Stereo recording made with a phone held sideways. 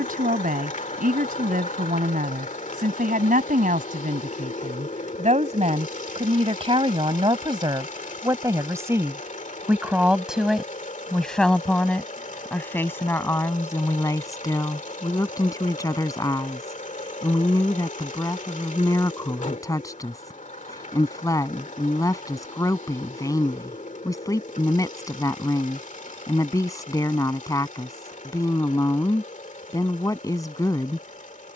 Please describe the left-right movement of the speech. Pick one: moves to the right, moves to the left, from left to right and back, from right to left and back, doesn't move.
moves to the left.